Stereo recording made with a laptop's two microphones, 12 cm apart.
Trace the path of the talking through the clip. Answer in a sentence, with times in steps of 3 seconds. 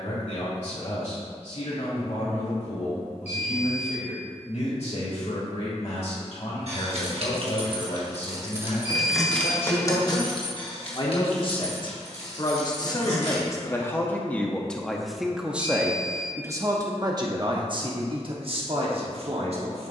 You can hear the talking on the left from 0 s and on the right from 15 s.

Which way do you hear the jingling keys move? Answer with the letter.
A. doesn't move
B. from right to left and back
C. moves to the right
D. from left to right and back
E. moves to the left
E.